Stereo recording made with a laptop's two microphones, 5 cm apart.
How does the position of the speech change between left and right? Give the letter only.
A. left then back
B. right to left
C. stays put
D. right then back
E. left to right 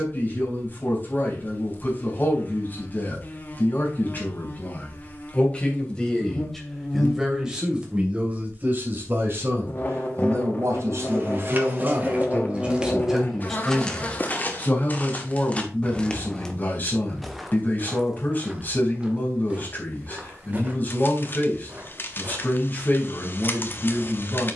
D.